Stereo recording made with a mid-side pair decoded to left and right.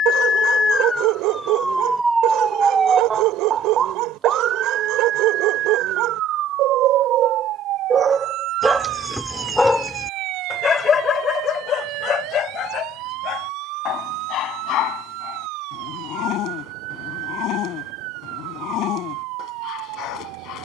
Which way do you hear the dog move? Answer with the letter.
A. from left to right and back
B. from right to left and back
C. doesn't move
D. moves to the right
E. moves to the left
E.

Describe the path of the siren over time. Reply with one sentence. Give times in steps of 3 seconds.
You can hear the siren in the centre from 0 s and on the right from 3 s.